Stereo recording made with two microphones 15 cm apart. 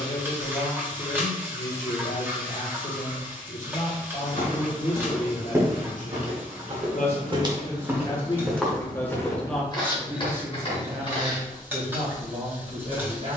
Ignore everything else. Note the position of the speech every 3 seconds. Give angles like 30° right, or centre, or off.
60° left, 60° left, 40° left, 10° right, 40° right.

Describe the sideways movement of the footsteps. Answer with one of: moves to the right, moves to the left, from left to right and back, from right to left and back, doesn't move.
from left to right and back.